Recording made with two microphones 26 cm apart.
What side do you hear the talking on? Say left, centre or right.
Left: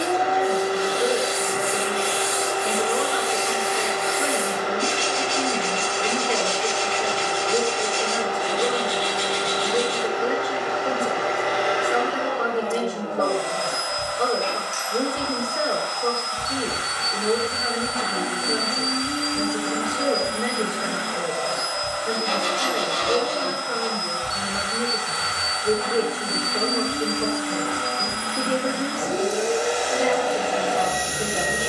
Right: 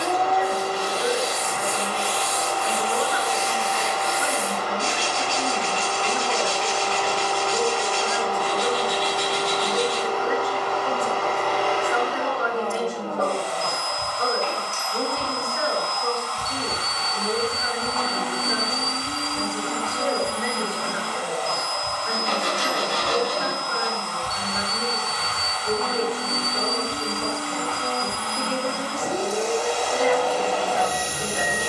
left.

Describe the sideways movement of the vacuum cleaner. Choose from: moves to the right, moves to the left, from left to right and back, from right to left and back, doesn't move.
doesn't move.